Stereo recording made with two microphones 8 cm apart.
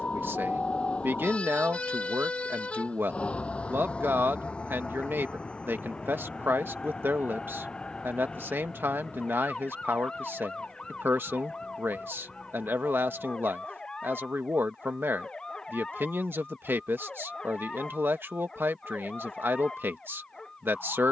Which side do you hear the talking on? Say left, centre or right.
right.